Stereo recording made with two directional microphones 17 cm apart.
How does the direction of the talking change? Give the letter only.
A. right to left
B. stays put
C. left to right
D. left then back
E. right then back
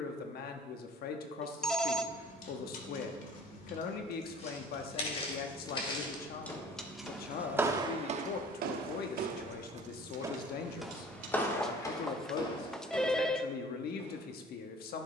B.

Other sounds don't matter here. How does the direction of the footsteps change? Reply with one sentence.
In this clip you hear the footsteps move from left to right and back again.